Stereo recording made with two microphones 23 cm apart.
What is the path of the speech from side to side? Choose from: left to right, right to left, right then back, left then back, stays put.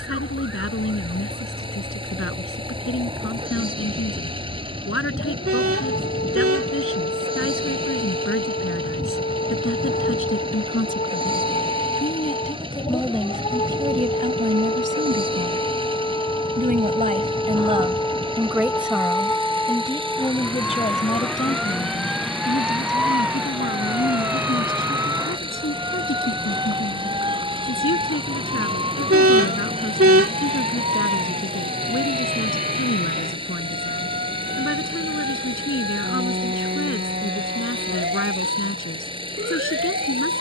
right then back.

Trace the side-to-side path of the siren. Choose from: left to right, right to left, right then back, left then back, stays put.
left to right.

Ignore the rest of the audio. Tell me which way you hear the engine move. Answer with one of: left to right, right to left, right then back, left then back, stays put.
stays put.